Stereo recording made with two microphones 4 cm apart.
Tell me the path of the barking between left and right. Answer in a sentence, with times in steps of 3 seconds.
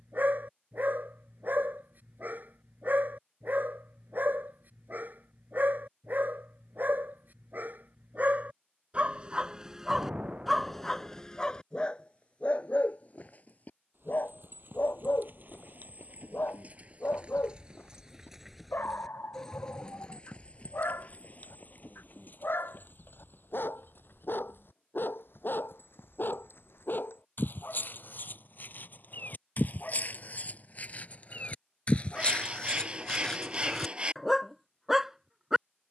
You can hear the barking on the right from 0 s, in the centre from 9 s, on the left from 12 s and in the centre from 33 s.